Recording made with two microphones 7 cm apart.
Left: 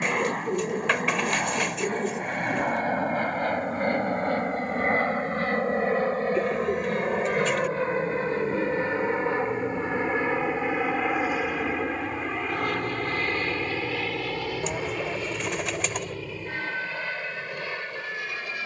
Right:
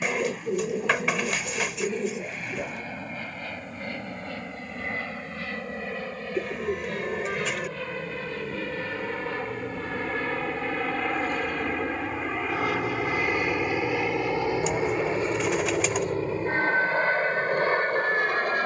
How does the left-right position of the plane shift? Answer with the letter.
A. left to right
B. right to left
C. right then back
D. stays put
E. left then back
A.